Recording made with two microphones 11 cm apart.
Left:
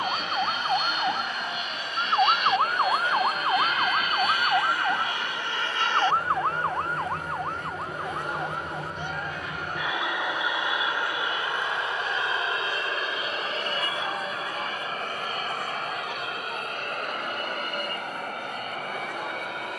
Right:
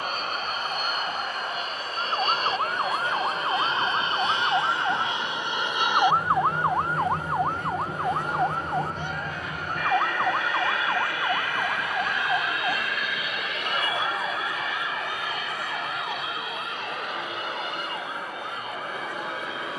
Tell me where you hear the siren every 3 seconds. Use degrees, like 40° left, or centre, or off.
40° left, centre, 30° right, 50° right, 60° right, 70° right, 70° right.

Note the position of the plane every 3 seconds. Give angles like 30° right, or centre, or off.
40° right, 20° right, centre, 20° left, 30° left, 40° left, 50° left.